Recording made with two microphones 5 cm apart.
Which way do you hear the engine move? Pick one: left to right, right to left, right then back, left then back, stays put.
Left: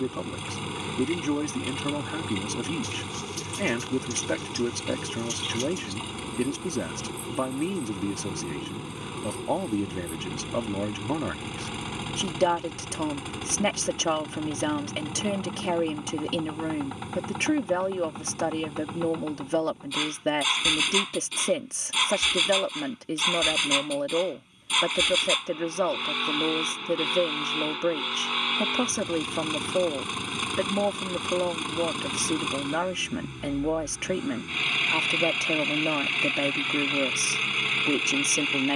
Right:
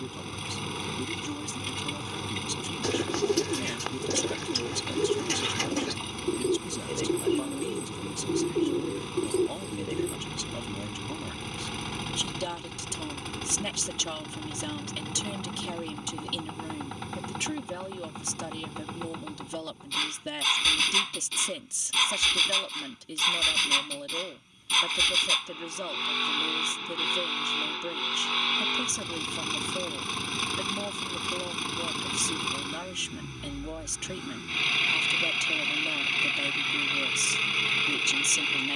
stays put.